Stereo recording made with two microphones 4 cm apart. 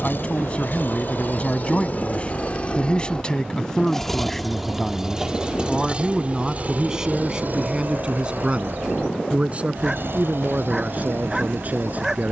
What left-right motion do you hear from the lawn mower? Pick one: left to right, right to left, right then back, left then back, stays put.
left to right.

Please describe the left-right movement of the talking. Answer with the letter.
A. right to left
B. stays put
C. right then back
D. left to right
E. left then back
D.